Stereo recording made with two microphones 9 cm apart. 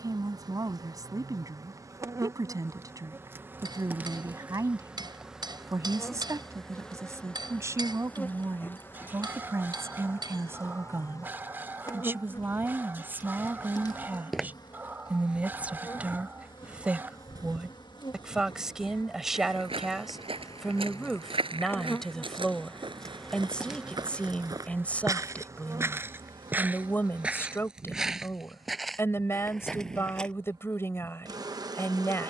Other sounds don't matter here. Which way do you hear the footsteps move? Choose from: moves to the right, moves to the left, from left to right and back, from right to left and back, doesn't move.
from left to right and back.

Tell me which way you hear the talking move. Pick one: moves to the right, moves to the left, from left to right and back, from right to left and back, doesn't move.
moves to the left.